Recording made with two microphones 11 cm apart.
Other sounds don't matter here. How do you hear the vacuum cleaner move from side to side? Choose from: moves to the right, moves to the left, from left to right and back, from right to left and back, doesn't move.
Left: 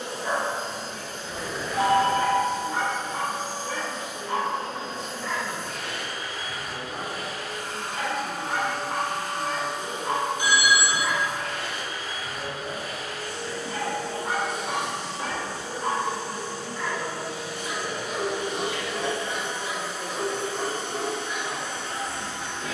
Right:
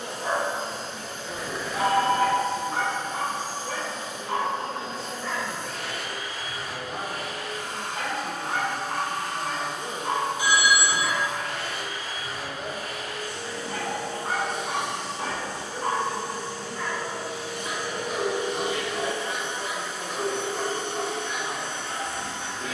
doesn't move.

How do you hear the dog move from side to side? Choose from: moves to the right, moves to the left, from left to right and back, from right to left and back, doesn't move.
doesn't move.